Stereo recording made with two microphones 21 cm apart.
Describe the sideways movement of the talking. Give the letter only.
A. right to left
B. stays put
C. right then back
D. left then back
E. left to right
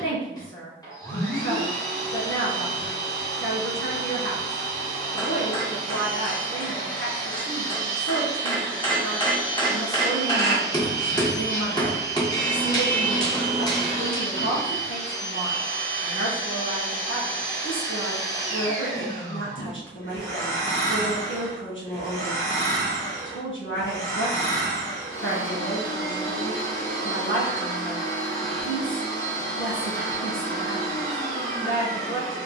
B.